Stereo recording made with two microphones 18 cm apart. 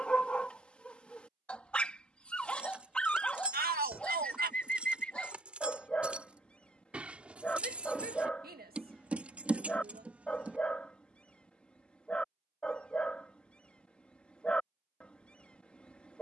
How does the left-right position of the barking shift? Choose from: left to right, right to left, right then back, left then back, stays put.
stays put.